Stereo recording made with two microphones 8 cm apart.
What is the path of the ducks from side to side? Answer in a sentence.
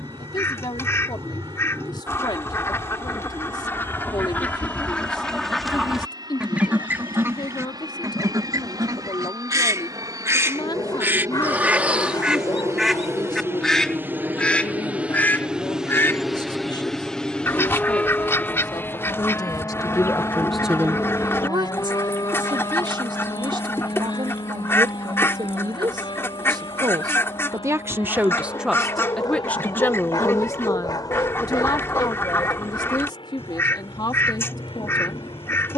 In this clip you hear the ducks go right and come back.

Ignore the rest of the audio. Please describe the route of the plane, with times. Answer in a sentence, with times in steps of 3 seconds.
In this clip you hear the plane on the right from 0 s, in the centre from 15 s and on the left from 18 s.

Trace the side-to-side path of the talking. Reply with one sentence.
In this clip you hear the talking move from left to right and back again.